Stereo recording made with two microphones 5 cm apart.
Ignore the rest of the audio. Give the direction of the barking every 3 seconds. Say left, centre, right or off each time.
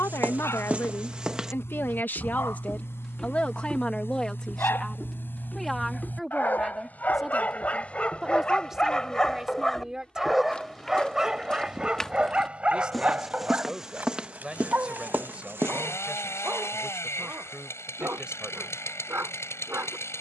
left, left, left, centre, right, right, right.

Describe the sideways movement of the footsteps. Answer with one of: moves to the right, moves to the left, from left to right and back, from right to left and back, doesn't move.
from right to left and back.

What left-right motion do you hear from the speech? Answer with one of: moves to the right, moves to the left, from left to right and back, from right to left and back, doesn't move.
moves to the right.